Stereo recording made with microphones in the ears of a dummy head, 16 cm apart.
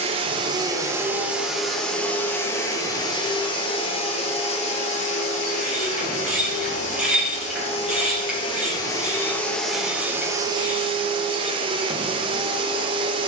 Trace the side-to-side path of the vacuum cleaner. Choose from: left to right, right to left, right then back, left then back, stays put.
left then back.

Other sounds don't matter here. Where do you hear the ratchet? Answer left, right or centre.
centre.